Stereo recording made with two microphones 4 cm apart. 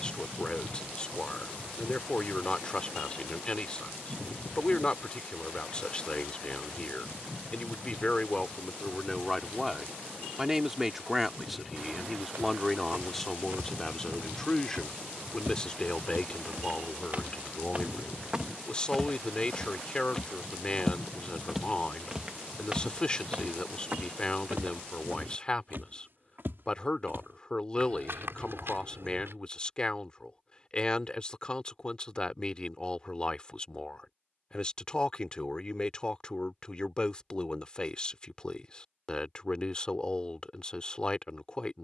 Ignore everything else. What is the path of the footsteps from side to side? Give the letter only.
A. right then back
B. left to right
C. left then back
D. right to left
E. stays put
C.